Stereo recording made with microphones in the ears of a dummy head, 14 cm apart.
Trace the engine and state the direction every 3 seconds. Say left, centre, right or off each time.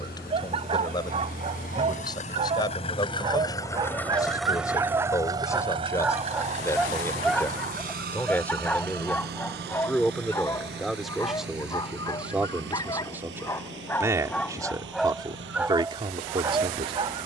left, centre, right, right, right, right.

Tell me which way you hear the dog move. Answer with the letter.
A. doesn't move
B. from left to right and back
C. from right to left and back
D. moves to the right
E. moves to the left
C.